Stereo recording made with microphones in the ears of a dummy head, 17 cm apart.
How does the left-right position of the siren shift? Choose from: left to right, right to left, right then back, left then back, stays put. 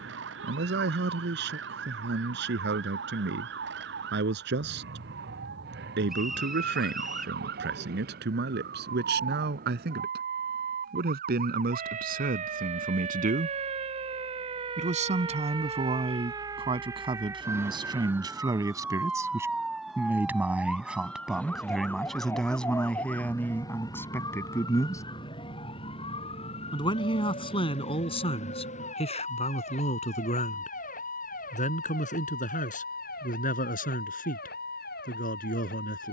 right to left.